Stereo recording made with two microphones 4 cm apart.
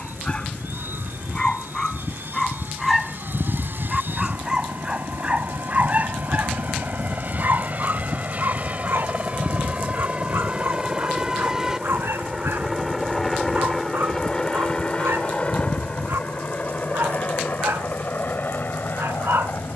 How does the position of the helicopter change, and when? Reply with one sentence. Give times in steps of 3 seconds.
You can hear the helicopter on the right from 0 s, in the centre from 12 s and on the left from 15 s.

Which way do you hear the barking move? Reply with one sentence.
In this clip you hear the barking travel towards the right.